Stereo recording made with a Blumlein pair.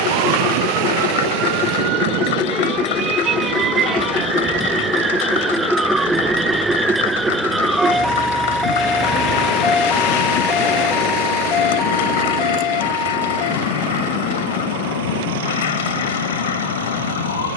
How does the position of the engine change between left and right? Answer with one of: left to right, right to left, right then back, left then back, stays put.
left to right.